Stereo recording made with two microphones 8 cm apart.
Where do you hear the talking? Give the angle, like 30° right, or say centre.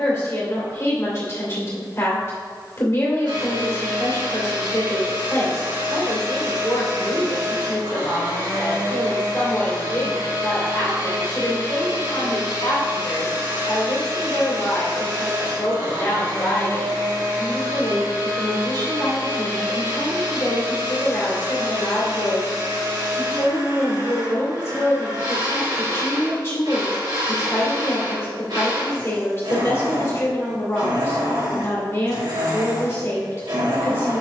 30° left.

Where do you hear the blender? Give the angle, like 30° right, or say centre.
70° right.